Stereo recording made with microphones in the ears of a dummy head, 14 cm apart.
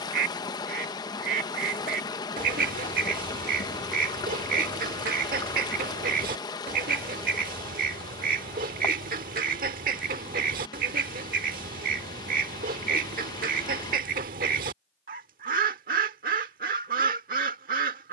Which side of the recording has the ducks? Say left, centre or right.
right.